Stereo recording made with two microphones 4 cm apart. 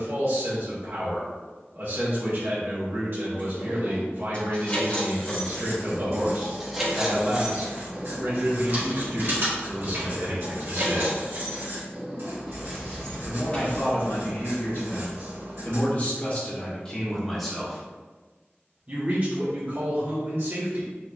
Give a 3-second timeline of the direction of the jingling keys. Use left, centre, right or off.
off, left, right, right, centre, off, off.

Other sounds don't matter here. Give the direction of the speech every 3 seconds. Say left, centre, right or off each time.
right, right, right, right, left, left, right.